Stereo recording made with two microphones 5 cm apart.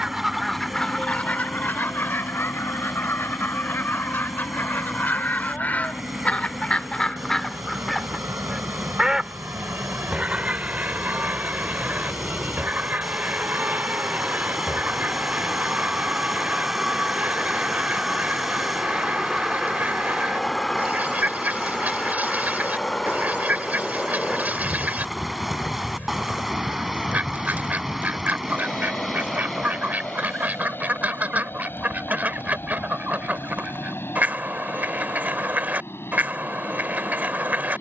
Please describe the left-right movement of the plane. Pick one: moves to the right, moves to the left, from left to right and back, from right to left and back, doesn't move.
moves to the left.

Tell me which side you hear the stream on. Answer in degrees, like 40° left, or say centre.
centre.